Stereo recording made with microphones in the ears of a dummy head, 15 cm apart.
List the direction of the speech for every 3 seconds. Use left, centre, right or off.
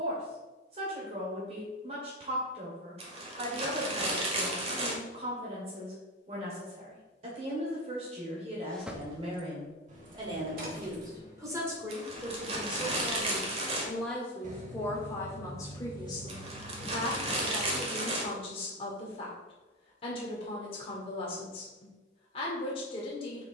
right, right, right, right, centre, left, left, left.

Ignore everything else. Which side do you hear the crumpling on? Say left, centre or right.
right.